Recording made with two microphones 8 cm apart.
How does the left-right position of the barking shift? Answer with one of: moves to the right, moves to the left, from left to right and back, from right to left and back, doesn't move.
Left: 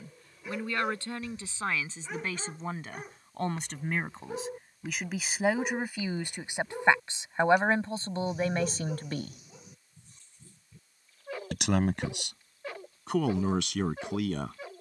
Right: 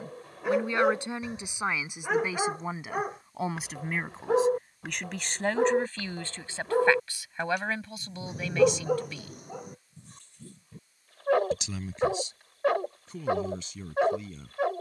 doesn't move.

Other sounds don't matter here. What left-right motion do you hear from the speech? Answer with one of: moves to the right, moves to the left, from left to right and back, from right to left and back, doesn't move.
moves to the left.